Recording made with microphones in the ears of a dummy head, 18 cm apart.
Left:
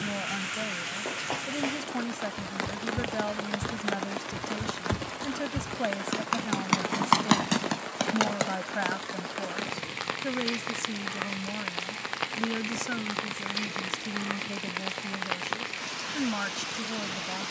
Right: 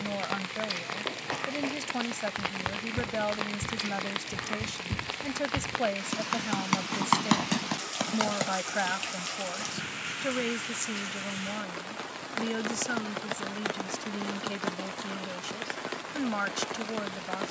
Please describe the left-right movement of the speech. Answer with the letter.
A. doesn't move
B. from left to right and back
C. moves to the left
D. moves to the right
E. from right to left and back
A.